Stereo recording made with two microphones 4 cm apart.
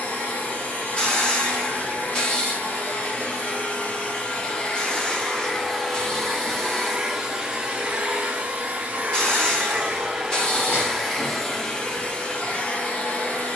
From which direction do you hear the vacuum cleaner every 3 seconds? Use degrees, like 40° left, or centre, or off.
40° left, 20° left, 20° right, 10° right, 30° left.